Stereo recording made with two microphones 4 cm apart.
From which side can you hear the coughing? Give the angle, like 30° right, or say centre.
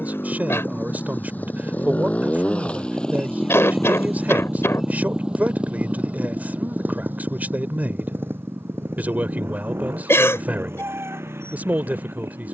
80° left.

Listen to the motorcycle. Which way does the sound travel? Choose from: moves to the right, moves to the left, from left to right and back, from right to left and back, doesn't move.
moves to the right.